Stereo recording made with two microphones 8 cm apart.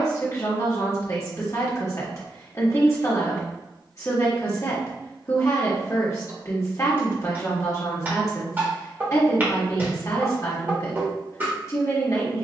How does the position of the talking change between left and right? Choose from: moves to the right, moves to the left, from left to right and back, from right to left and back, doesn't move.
doesn't move.